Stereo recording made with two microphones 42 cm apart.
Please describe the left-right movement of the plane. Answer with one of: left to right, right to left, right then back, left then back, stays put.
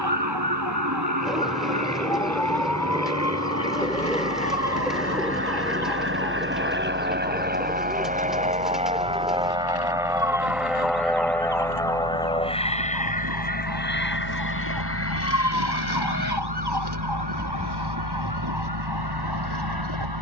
right to left.